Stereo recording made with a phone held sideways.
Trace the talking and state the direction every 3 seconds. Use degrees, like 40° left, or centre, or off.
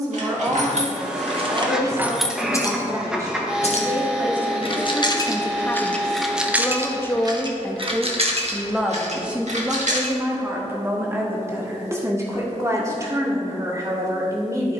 30° right, 10° right, 10° left, 10° right, 20° right.